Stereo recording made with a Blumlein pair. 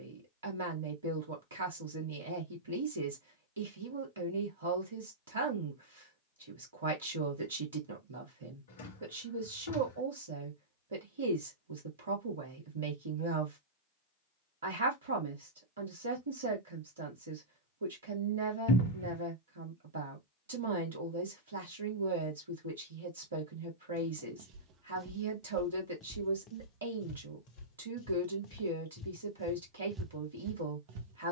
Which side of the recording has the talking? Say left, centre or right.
right.